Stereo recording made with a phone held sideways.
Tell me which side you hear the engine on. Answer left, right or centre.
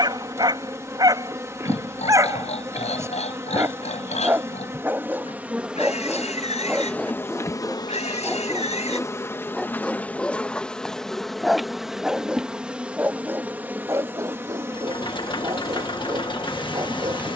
left.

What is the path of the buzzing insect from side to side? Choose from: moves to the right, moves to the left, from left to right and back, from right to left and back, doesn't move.
from right to left and back.